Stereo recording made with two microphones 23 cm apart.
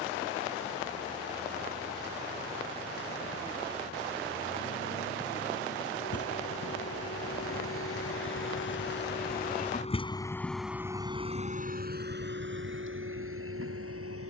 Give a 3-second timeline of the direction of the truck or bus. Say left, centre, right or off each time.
left, left, left, centre, right.